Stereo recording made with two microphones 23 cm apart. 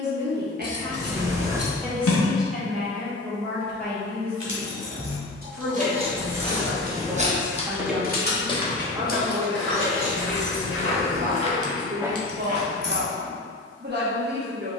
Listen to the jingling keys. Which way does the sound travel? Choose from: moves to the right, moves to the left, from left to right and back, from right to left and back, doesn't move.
from right to left and back.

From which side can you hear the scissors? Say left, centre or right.
left.